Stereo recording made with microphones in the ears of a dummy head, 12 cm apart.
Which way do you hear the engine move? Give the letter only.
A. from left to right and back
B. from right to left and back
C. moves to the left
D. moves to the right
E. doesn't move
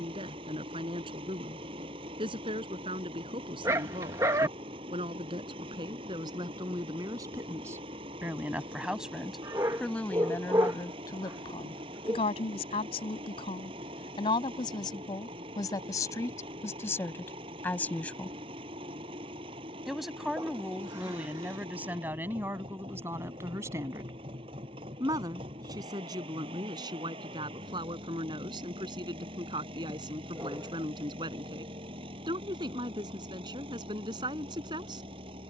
E.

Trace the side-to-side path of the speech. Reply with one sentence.
In this clip you hear the speech go left and come back.